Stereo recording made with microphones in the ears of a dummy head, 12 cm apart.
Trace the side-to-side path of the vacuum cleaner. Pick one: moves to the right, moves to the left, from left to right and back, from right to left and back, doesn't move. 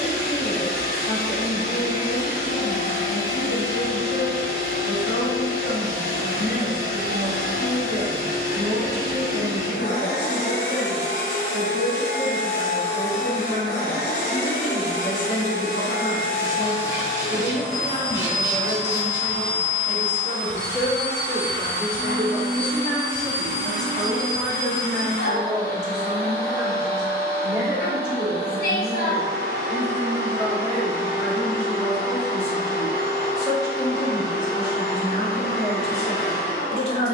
doesn't move.